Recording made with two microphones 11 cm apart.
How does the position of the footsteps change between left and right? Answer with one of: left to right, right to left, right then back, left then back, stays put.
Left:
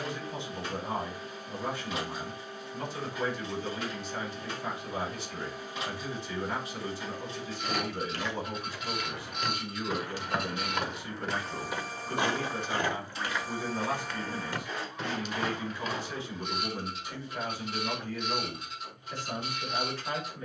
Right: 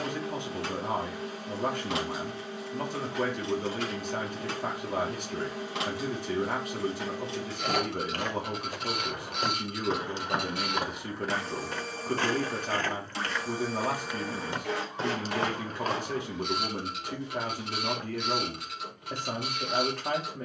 left then back.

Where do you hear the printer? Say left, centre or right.
right.